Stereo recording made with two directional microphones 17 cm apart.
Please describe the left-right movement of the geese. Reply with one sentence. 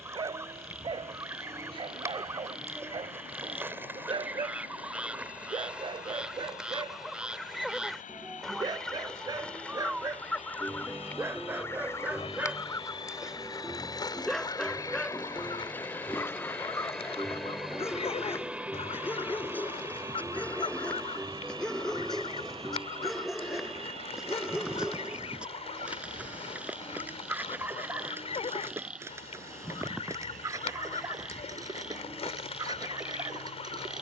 In this clip you hear the geese travel towards the left.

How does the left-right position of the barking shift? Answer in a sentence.
You can hear the barking move from right to left and back again.